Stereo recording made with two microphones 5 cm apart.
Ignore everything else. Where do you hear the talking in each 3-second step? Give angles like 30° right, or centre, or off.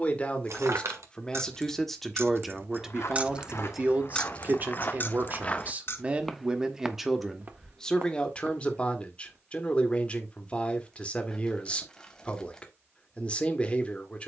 10° left, 30° right, centre, 30° left, 30° left.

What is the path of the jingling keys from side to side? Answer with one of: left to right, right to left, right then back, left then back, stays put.
right to left.